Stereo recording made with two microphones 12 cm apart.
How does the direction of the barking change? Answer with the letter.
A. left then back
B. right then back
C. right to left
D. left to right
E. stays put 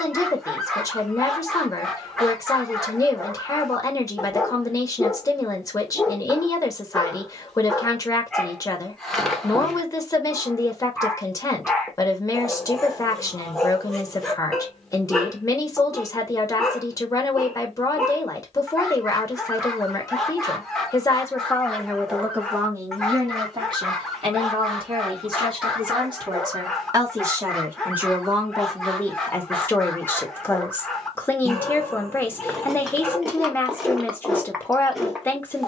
E.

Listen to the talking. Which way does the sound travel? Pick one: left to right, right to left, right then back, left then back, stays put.
right then back.